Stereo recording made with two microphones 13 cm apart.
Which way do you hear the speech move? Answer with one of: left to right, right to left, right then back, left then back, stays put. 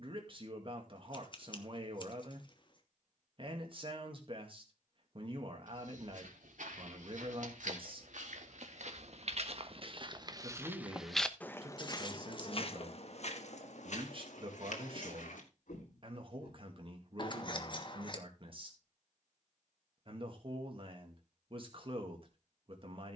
stays put.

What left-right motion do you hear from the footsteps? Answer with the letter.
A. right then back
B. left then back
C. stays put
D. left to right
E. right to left
E.